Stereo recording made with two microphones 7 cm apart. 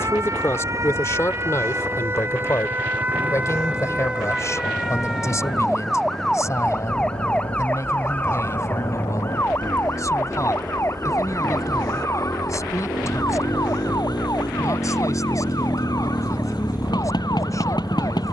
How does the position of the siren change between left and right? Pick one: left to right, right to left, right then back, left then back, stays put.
right to left.